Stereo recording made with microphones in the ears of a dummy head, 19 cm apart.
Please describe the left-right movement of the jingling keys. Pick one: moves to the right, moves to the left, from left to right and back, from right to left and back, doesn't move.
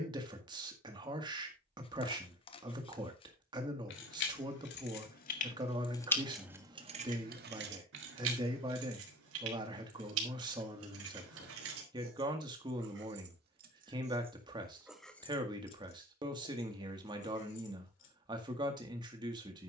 from left to right and back.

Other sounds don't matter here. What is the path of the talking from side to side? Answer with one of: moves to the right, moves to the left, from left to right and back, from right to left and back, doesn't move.
doesn't move.